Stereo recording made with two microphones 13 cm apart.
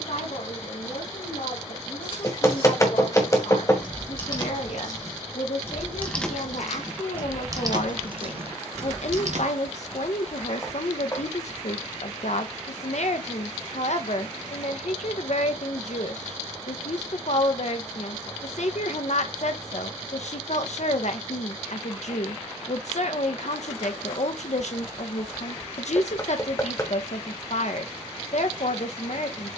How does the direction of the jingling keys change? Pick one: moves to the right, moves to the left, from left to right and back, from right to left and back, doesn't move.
moves to the right.